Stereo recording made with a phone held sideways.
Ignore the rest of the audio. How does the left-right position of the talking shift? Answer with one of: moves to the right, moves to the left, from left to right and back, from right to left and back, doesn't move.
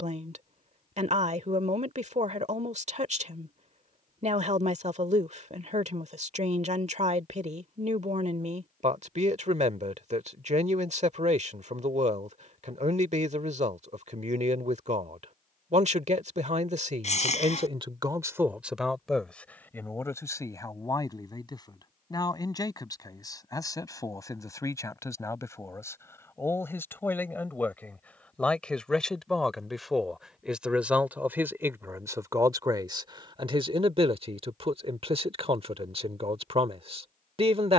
from right to left and back.